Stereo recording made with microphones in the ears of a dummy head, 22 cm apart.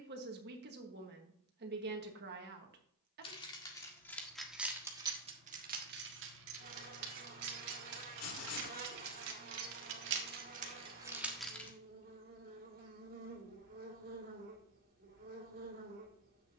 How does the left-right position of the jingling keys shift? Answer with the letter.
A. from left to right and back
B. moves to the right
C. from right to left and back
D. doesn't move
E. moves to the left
A.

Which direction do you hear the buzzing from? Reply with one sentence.
You can hear the buzzing on the right.